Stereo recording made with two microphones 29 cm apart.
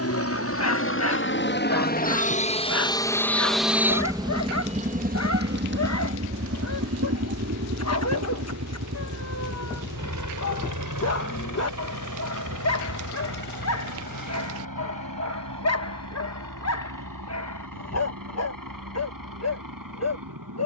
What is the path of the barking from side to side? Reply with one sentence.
In this clip you hear the barking stay put.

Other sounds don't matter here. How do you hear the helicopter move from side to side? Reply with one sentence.
In this clip you hear the helicopter move to the right.